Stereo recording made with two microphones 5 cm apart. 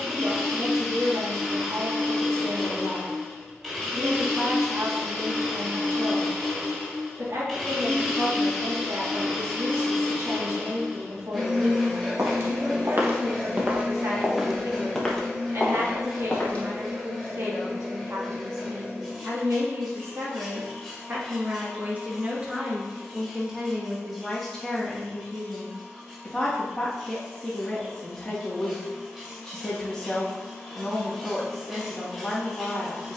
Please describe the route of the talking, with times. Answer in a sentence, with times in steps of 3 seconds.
You can hear the talking on the right from 0 s and in the centre from 24 s.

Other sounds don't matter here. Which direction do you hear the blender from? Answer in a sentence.
You can hear the blender in the centre.